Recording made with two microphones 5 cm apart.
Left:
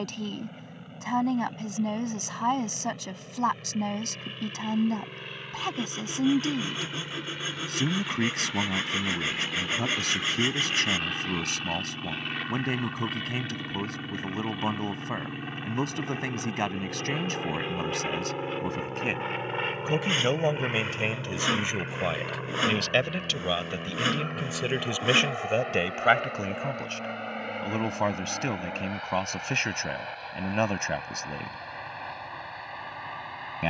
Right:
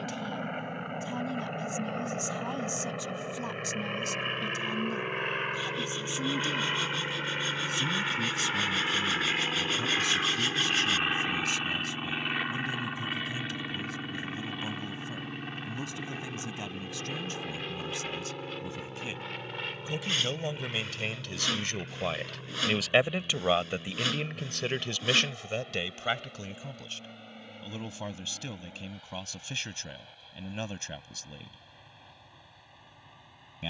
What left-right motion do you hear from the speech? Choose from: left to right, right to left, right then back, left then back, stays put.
right then back.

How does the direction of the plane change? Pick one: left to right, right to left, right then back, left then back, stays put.
right to left.